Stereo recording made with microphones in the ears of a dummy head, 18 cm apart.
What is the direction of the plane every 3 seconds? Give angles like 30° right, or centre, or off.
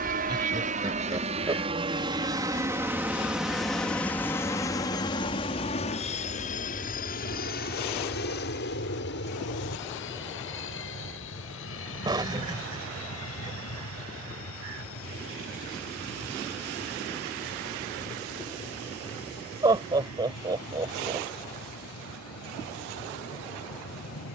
30° right, 10° left, 40° left, 60° left, 70° left, 70° left, 70° left, 80° left.